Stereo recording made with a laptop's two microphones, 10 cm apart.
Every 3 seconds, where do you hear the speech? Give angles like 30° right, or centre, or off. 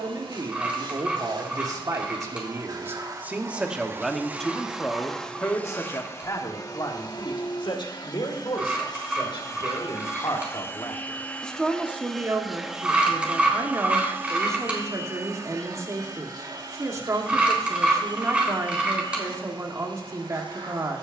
40° right, 10° left, 50° left, 40° left, 30° right, 30° right, 30° right.